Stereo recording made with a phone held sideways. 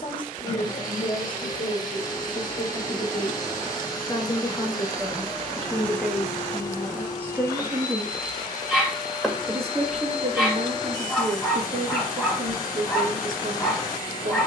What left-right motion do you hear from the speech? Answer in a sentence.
In this clip you hear the speech travel towards the right.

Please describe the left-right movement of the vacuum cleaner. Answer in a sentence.
In this clip you hear the vacuum cleaner stay put.